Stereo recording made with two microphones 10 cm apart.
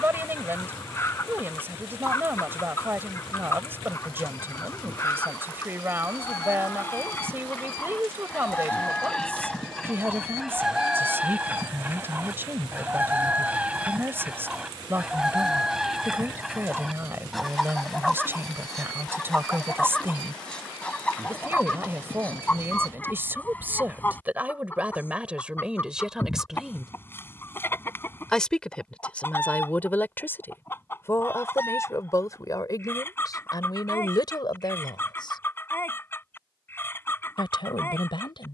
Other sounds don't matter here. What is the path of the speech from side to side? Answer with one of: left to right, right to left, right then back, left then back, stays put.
right to left.